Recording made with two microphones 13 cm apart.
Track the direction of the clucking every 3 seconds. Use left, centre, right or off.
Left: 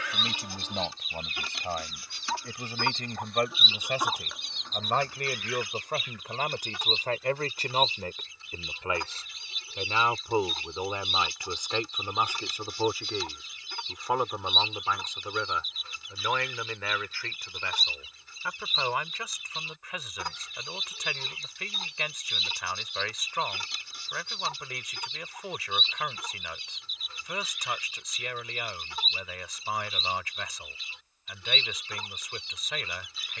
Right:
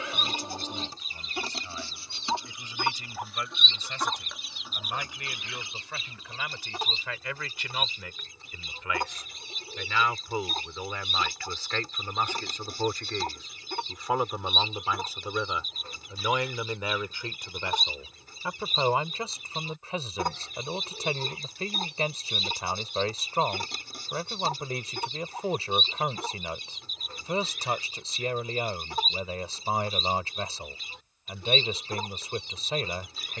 right, centre, right, right, right, right, right, right, right, right, right.